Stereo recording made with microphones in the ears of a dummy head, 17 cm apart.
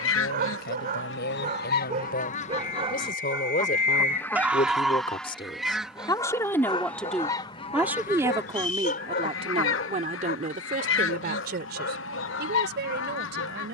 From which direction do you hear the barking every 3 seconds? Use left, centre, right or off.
right, centre, left, left, left.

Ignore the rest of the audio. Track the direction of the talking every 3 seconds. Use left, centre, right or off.
left, left, centre, right, right.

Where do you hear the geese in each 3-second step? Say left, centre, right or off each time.
left, centre, left, left, left.